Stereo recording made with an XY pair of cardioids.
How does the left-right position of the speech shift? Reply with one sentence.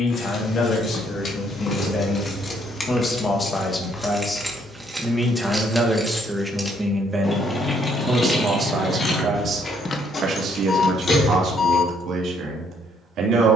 In this clip you hear the speech move from left to right.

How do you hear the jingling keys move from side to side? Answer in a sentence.
You can hear the jingling keys go right and come back.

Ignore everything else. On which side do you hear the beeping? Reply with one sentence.
You can hear the beeping on the left.